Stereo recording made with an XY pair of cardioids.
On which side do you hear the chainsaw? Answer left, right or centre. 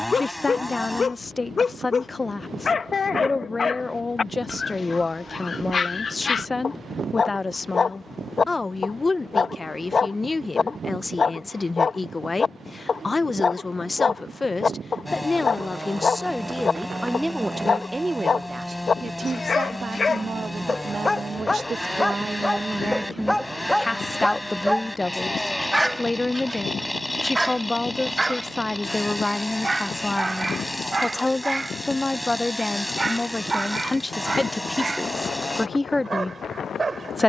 centre.